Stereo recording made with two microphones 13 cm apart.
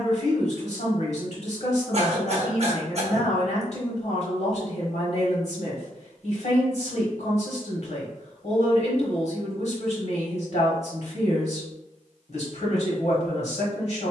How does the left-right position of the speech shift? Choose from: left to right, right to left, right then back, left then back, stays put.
stays put.